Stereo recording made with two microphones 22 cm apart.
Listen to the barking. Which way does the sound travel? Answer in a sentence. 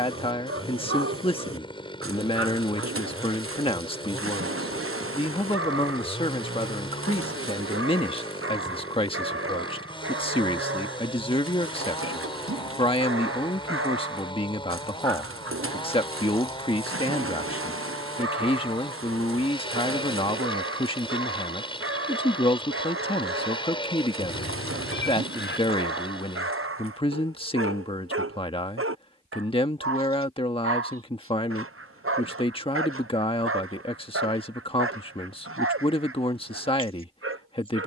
In this clip you hear the barking stay put.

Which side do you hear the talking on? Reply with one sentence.
In this clip you hear the talking on the left.